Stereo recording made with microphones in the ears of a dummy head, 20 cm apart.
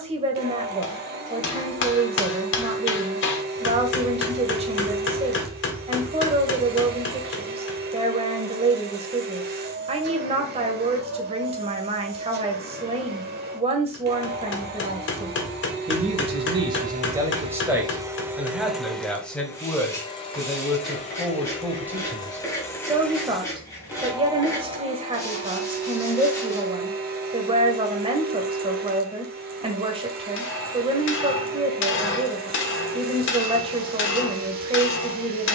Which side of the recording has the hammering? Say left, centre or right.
left.